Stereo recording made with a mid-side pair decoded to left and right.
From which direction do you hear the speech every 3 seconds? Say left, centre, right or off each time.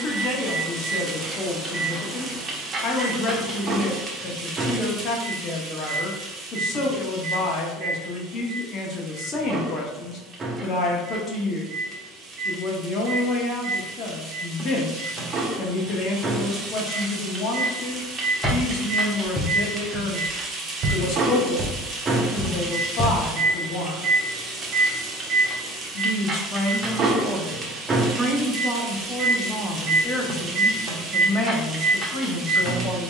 left, left, left, left, left, left, left, left, left, centre, left.